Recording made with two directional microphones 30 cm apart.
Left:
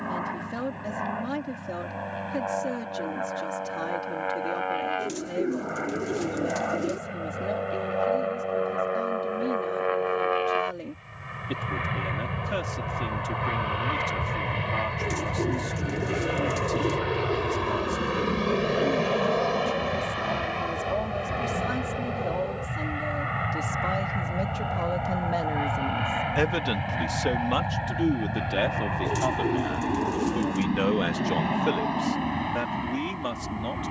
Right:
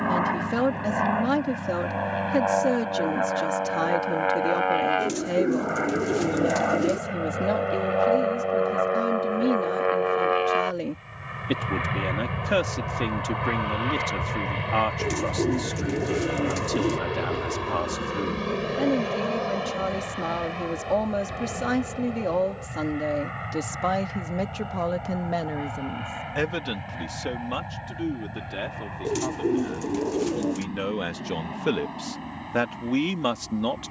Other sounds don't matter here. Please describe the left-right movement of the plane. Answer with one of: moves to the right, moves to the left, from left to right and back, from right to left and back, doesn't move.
moves to the left.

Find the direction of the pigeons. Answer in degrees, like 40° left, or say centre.
20° right.